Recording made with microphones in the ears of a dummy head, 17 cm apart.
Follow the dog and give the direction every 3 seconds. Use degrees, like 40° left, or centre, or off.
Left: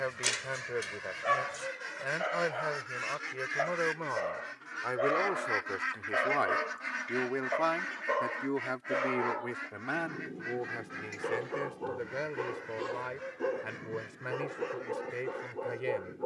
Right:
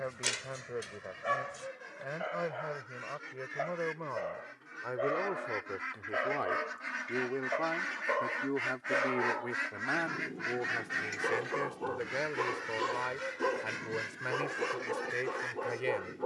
20° left, 20° left, 10° left, 10° right, 40° right, 40° right.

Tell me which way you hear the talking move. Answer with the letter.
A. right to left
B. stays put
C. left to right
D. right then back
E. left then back
C.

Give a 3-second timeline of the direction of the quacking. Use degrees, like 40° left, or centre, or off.
60° left, 40° left, 10° right, 50° right, 70° right, 80° right.